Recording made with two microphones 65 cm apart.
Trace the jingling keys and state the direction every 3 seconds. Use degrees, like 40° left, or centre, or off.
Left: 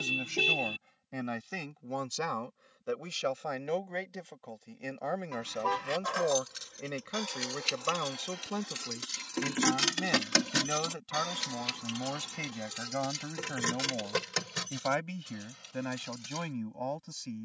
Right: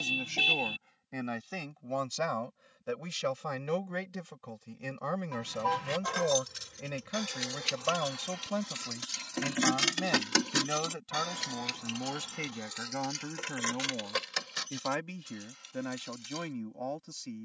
off, 60° right, 40° right, 10° left, 60° left, 70° left.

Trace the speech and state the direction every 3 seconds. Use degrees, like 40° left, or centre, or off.
centre, 30° right, 20° right, centre, 10° left, 20° left.